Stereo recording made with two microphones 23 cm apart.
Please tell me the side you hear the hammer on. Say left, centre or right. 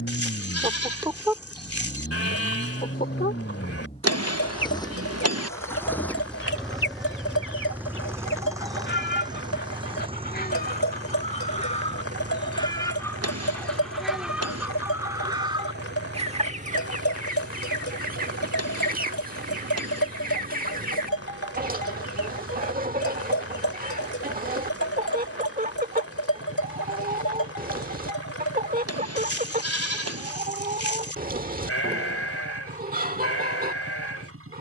right.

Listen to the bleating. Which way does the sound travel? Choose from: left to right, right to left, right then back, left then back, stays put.
stays put.